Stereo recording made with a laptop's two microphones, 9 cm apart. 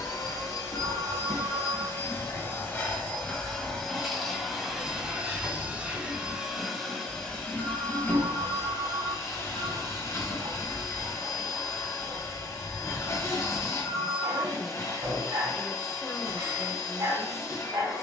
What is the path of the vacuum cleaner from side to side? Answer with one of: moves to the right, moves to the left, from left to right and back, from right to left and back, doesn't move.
from left to right and back.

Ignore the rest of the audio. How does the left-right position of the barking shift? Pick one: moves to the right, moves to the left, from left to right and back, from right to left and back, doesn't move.
doesn't move.